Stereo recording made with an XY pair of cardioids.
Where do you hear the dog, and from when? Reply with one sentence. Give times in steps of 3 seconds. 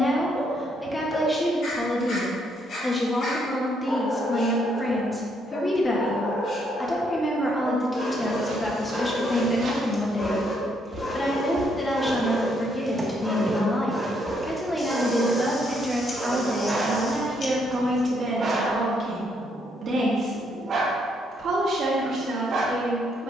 You can hear the dog on the left from 0 s, in the centre from 12 s and on the right from 15 s.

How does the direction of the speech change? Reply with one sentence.
In this clip you hear the speech move to the right.